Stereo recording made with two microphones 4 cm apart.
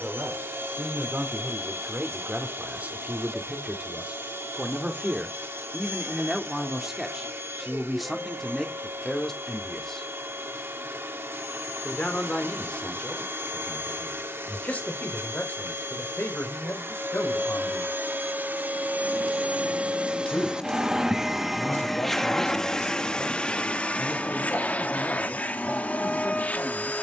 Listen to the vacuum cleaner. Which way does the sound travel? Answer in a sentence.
In this clip you hear the vacuum cleaner move from right to left.